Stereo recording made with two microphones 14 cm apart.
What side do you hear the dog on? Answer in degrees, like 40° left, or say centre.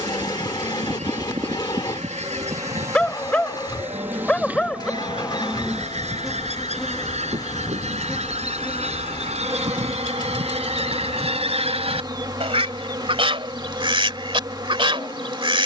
10° left.